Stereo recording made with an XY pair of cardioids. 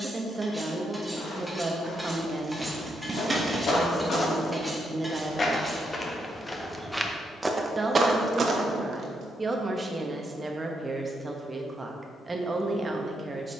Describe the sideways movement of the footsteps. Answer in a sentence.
In this clip you hear the footsteps travel towards the right.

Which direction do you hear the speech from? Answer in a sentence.
In this clip you hear the speech on the right.